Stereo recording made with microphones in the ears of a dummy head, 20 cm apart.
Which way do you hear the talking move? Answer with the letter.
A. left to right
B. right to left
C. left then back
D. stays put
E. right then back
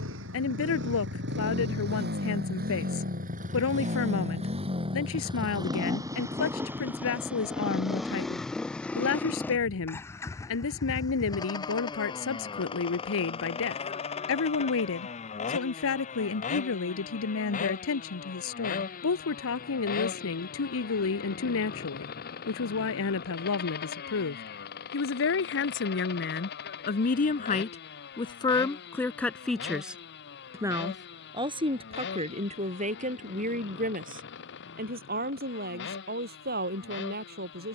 A.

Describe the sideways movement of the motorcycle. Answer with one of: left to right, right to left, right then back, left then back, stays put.
right to left.